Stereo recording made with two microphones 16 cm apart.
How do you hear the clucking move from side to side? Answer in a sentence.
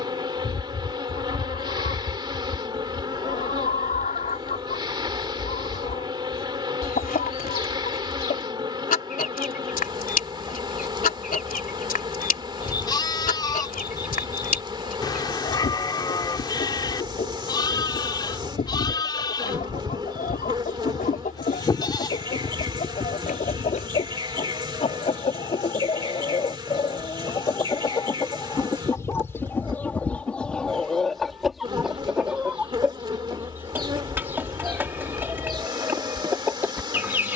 You can hear the clucking move from left to right.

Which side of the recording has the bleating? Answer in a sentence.
You can hear the bleating on the left.